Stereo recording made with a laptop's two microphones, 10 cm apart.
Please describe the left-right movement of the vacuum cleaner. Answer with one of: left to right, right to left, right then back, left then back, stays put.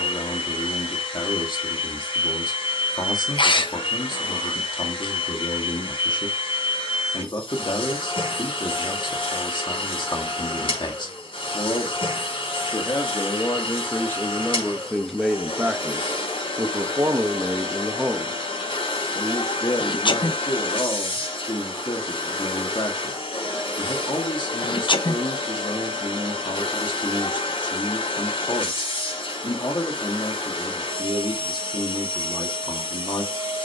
stays put.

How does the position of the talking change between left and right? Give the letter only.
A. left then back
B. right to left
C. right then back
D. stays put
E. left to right
C.